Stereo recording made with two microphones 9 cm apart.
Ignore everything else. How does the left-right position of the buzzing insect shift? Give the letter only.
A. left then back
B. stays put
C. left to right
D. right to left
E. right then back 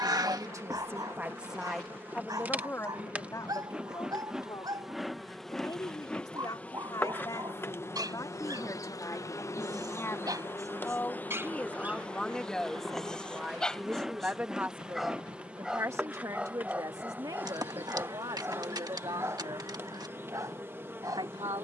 A.